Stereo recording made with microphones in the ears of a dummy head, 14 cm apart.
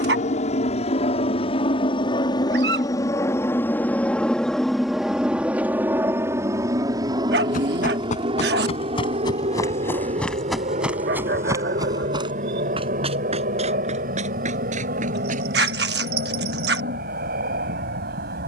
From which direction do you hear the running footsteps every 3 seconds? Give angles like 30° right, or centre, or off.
off, off, 50° left, centre, 40° right, 50° right.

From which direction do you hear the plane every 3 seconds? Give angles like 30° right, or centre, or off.
40° left, centre, 30° right, 40° right, 50° right, 60° right.